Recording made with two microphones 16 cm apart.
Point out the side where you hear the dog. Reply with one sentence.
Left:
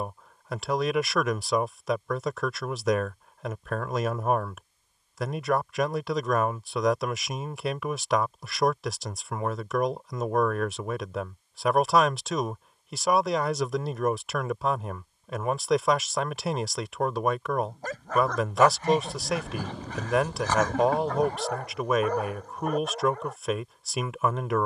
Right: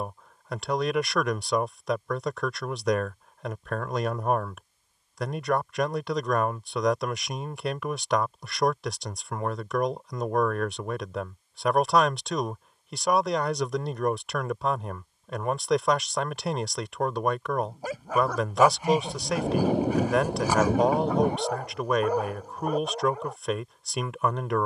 You can hear the dog in the centre.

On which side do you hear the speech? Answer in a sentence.
In this clip you hear the speech in the centre.